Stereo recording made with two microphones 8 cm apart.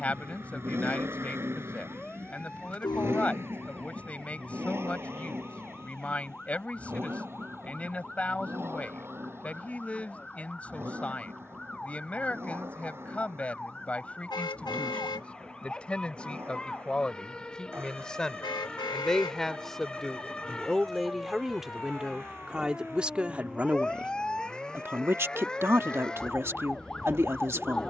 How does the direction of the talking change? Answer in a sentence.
You can hear the talking go from the left side to the right.